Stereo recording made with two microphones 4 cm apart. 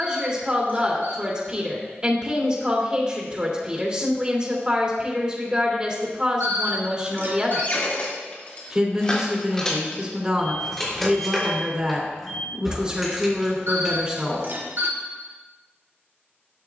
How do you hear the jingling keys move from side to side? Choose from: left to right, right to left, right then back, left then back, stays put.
left to right.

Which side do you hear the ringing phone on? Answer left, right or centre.
right.